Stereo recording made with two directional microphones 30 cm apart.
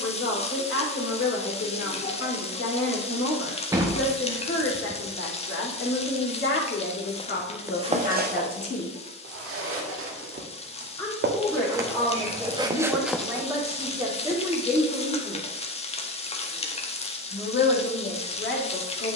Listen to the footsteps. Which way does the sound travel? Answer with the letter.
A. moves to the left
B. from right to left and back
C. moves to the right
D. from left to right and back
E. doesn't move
D.